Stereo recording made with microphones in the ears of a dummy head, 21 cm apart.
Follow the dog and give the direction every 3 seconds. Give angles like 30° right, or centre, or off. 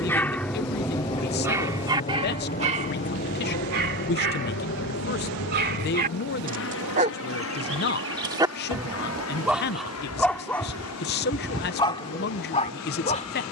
10° right, 50° right, 30° right, 10° left, 30° left.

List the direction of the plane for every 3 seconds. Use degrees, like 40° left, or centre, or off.
20° left, 50° left, 60° left, 70° left, 70° left.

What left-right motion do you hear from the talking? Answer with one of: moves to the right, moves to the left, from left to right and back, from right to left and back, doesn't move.
doesn't move.